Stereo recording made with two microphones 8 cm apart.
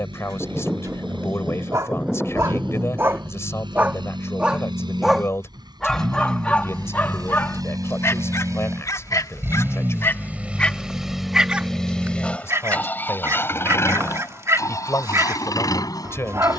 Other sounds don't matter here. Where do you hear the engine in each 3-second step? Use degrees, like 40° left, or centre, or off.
70° right, 60° right, 50° right, 10° right, 30° left, 50° left.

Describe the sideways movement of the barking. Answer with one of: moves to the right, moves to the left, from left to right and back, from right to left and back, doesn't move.
from right to left and back.